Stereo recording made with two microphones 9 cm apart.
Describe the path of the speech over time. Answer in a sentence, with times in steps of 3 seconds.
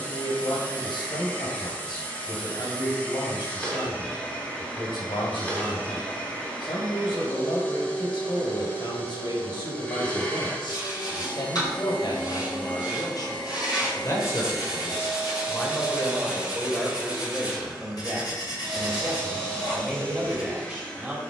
In this clip you hear the speech on the left from 0 s and in the centre from 15 s.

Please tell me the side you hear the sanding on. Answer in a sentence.
You can hear the sanding on the left.